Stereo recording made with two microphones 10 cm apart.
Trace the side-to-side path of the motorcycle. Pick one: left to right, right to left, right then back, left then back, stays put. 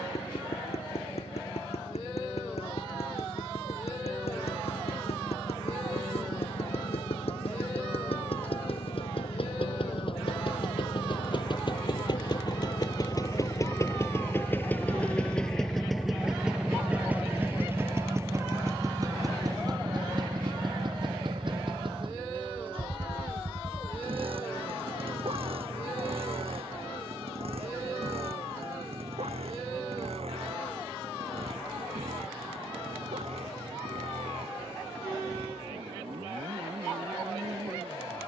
left to right.